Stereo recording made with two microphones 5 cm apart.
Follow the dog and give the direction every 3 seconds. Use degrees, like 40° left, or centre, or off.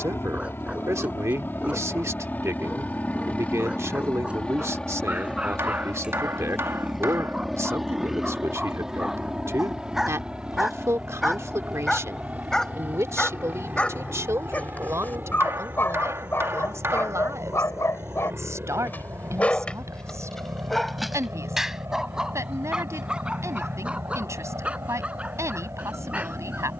20° right, 20° right, 20° right, centre, 20° left, 50° left, 20° left, 10° right, 20° right.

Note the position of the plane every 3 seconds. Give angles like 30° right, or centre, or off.
40° left, 20° left, centre, 20° right, 30° right, 40° right, 40° right, 50° right, 50° right.